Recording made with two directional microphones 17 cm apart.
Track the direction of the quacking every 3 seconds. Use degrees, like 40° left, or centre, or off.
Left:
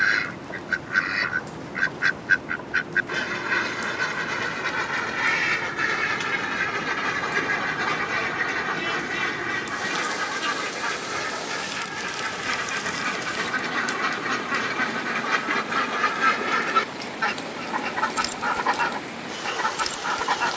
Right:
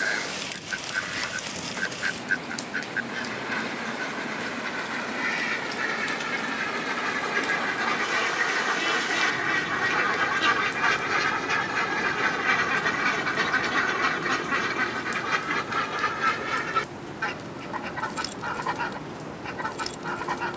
40° left, 30° left, 10° left, 30° right, 20° right, 20° left, 30° left.